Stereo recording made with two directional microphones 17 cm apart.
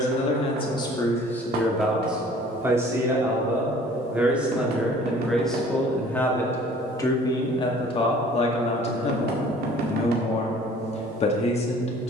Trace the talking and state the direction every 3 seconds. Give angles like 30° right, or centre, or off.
10° left, centre, 30° left, 40° left.